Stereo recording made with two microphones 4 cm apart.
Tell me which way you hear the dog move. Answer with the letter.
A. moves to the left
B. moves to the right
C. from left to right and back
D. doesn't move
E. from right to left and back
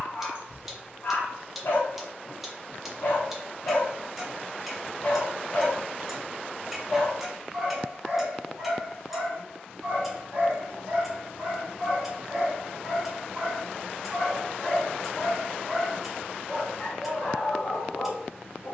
C.